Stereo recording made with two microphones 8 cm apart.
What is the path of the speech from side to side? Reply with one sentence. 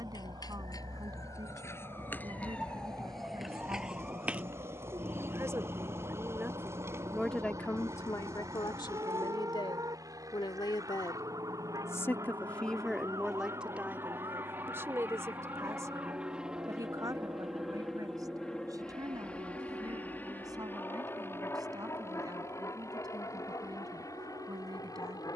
In this clip you hear the speech go left and come back.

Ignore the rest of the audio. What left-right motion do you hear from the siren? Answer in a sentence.
You can hear the siren go from the left side to the right.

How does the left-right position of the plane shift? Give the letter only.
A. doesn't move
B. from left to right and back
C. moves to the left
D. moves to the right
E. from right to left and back
C.